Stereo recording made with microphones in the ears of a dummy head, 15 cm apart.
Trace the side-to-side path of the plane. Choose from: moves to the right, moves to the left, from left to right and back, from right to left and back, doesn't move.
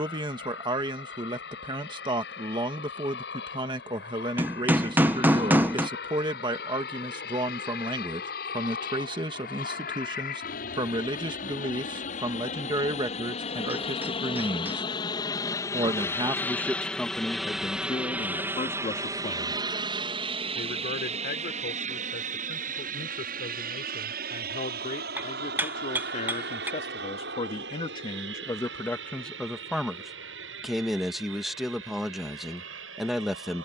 moves to the right.